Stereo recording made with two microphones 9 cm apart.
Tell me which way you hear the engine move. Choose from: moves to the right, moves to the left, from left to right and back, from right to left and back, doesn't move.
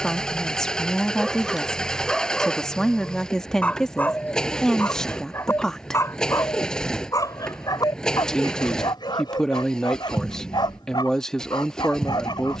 doesn't move.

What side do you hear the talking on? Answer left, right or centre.
centre.